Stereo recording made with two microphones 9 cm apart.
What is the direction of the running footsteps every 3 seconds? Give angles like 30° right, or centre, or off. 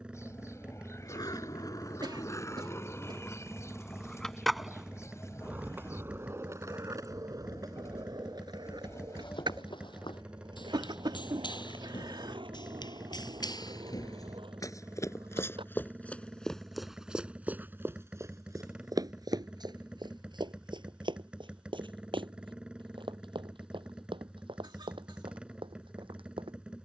off, off, off, 70° left, 50° left, 10° left, 50° right, 70° right, 80° right.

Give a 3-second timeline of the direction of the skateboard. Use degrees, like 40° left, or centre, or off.
40° left, centre, 40° right, 60° right, 70° right, 70° right, off, off, off.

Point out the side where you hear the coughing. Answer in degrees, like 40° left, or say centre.
60° right.